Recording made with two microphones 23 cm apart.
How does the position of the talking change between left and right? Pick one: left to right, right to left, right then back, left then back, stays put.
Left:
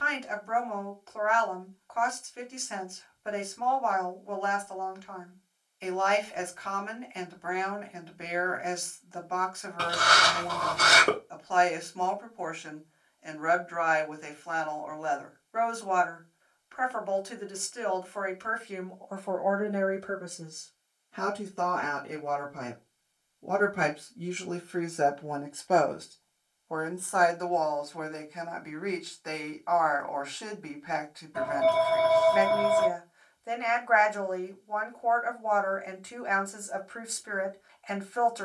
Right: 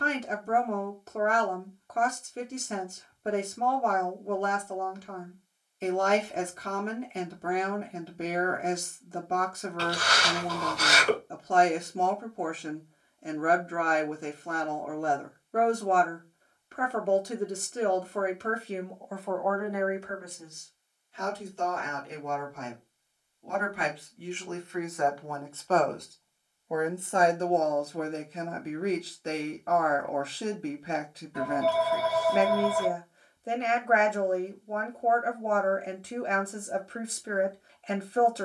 left then back.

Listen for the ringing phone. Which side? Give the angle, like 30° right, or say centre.
50° left.